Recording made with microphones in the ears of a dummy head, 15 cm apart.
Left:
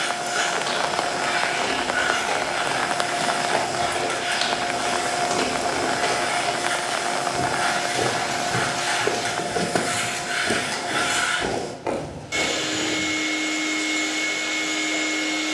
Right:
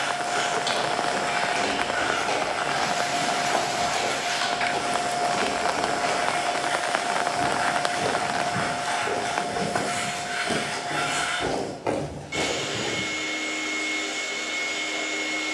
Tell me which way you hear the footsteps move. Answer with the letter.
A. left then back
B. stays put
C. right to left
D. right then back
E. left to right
A.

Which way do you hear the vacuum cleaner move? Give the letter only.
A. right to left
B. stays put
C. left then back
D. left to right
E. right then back
B.